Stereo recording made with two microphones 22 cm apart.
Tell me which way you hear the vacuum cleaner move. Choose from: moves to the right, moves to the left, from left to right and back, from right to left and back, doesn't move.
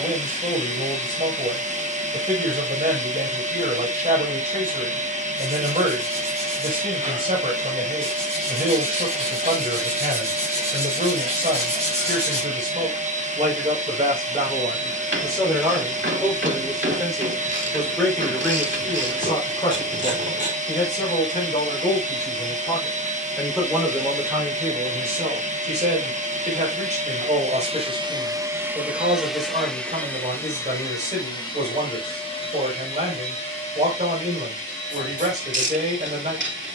moves to the left.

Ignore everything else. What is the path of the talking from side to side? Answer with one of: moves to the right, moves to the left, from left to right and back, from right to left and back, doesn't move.
from right to left and back.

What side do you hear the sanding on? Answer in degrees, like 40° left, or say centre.
30° right.